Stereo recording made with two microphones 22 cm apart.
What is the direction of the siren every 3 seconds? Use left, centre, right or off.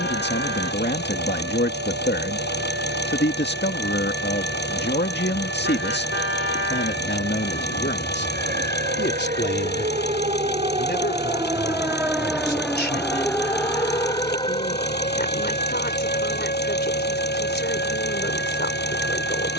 right, right, right, right, centre, left, left.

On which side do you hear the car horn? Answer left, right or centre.
left.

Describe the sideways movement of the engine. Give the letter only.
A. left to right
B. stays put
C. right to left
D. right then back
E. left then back
B.